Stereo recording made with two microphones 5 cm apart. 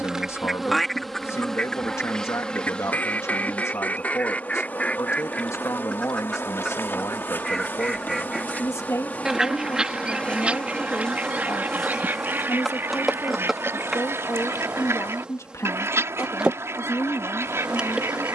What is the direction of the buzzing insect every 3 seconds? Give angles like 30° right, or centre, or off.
10° left, 30° left, 40° left, 20° left, 10° right, 20° right.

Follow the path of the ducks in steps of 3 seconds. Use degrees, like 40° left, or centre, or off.
10° left, 30° left, 10° left, 20° right, 50° right, 60° right.